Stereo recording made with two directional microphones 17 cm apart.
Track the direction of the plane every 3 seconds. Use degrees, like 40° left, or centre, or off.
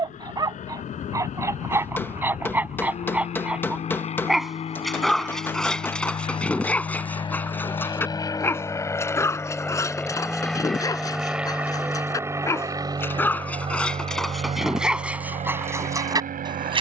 50° left, 40° left, 30° left, centre, 30° right, 50° right.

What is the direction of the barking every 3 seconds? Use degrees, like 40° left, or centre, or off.
10° right, centre, 10° left, 20° left, 10° left, 20° right.